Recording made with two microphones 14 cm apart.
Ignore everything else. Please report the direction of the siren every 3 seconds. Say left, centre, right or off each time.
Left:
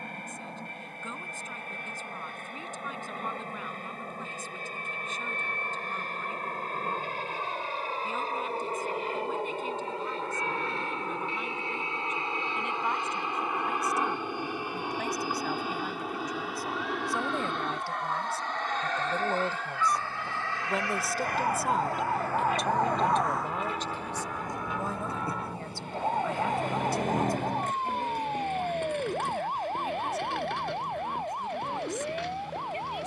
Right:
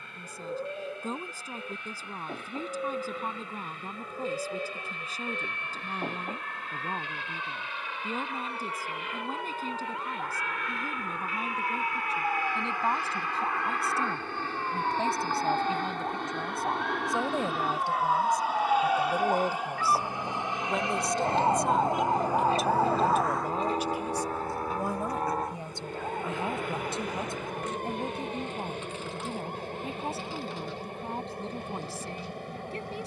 right, right, right, right, right, right, right, centre, left, left, left.